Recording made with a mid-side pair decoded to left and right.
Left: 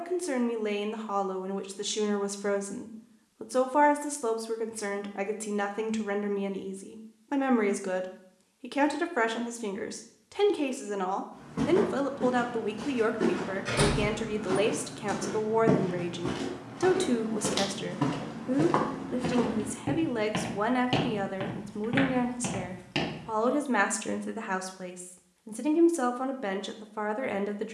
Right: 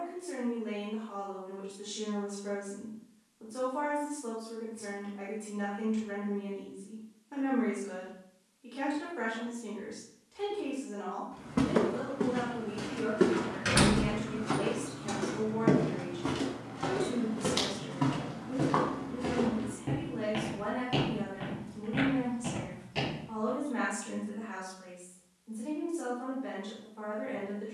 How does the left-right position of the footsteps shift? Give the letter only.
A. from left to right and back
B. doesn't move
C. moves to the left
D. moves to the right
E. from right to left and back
C.